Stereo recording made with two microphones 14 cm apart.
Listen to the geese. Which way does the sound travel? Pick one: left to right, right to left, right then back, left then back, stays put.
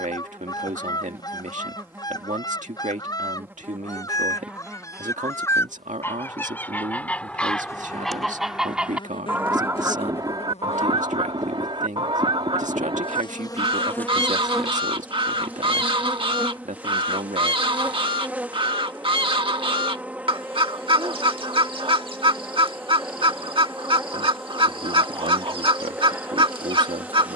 left to right.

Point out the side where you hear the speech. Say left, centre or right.
right.